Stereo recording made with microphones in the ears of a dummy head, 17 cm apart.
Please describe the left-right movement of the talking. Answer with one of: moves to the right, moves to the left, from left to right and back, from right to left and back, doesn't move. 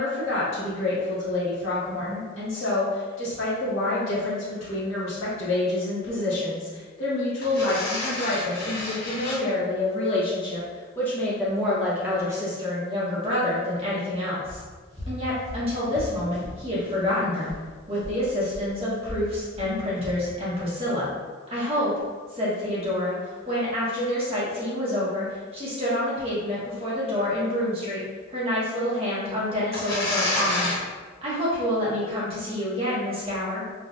moves to the right.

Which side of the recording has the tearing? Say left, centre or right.
left.